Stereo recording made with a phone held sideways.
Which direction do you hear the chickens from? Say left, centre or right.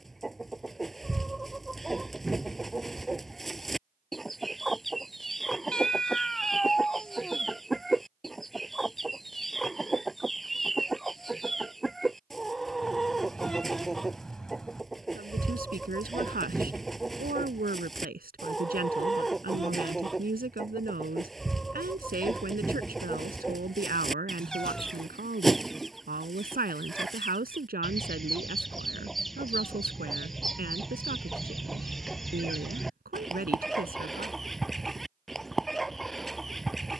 centre.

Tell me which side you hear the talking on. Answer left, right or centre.
right.